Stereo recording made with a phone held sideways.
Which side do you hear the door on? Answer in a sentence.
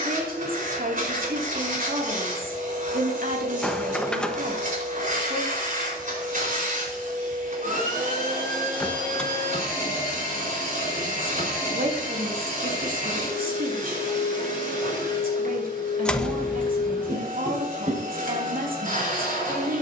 You can hear the door in the centre.